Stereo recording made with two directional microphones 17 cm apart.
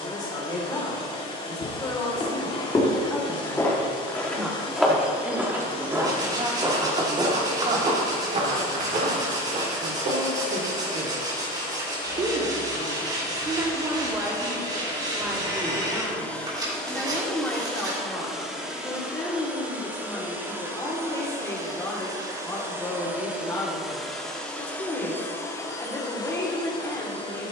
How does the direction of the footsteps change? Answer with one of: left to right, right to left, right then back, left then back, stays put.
left to right.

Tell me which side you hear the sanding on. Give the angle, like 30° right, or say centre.
20° right.